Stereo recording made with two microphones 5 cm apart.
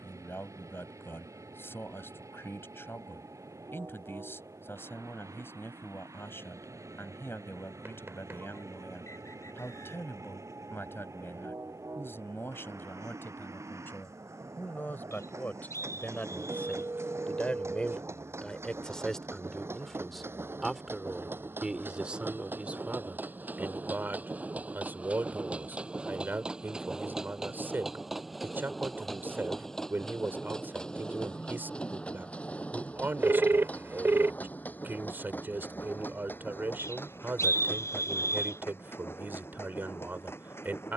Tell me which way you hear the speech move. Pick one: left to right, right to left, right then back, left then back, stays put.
left to right.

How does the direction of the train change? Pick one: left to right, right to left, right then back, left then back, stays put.
right to left.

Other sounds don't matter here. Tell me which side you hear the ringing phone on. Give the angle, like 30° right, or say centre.
50° right.